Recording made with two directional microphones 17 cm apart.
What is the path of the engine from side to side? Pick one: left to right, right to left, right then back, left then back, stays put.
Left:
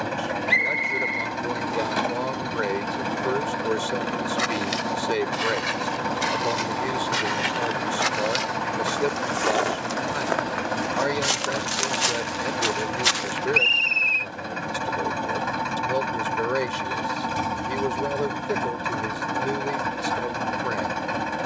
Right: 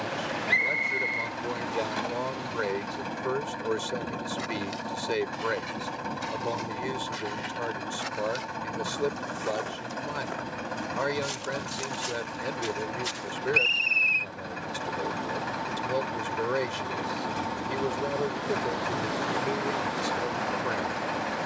stays put.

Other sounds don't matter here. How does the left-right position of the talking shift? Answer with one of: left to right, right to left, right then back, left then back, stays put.
stays put.